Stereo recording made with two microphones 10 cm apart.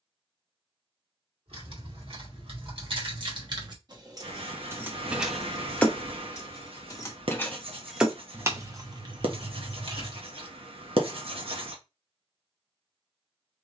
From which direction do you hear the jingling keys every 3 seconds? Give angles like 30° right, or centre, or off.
60° right, 30° right, centre, 50° right, off.